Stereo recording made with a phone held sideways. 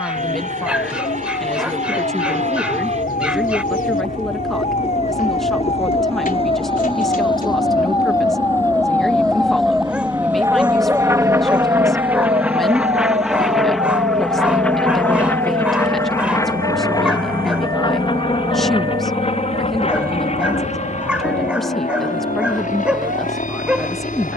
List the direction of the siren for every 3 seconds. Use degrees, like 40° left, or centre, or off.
60° left, 50° left, 30° left, 10° right, 50° right, 70° right, 70° right, 80° right.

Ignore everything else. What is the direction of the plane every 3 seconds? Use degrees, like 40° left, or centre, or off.
50° right, 50° right, 40° right, 20° right, centre, 20° left, 40° left, 50° left.